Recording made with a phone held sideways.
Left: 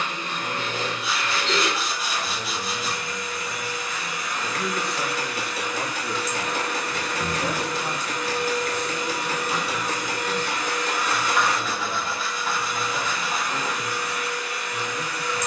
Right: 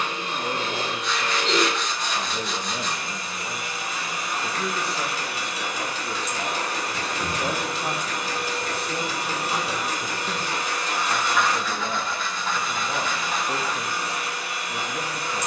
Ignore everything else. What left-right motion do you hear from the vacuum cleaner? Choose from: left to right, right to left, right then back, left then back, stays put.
stays put.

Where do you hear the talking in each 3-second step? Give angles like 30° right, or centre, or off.
50° right, 10° right, 10° right, 40° right, 50° right.